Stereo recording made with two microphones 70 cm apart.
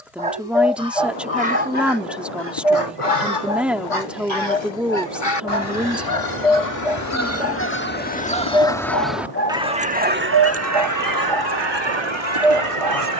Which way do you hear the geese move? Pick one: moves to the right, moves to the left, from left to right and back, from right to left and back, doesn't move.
moves to the right.